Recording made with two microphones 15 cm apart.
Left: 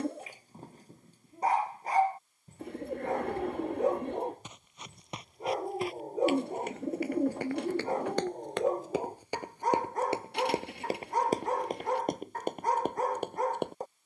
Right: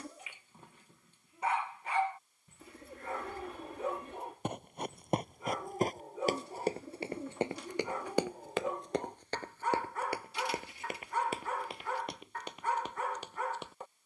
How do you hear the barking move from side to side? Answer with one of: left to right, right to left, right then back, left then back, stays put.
stays put.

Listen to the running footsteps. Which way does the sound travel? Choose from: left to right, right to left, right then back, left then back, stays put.
right to left.